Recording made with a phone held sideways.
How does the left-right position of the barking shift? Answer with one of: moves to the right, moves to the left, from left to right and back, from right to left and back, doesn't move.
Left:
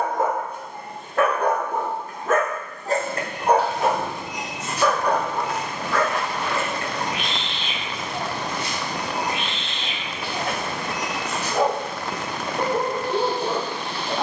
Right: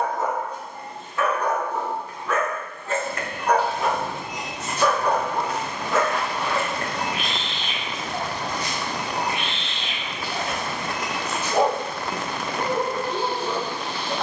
from left to right and back.